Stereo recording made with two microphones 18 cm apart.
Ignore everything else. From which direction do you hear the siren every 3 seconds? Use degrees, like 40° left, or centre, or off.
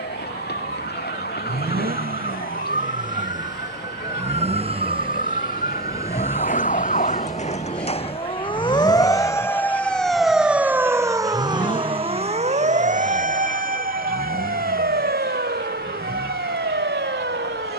70° left, 60° left, 40° left, 10° right, 50° right, 60° right.